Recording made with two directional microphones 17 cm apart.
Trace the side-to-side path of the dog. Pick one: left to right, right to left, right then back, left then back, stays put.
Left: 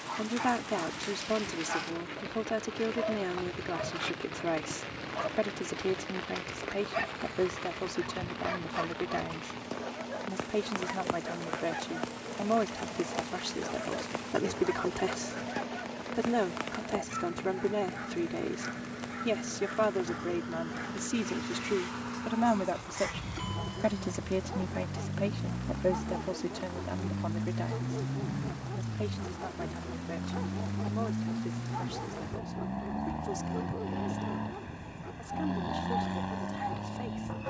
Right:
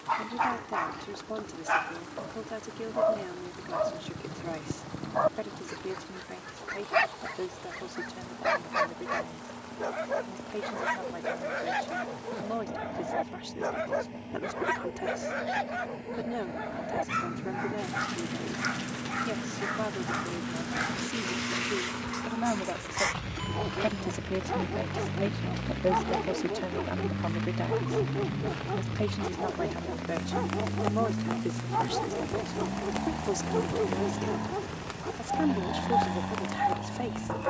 stays put.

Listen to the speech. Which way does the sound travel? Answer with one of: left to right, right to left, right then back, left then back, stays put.
left to right.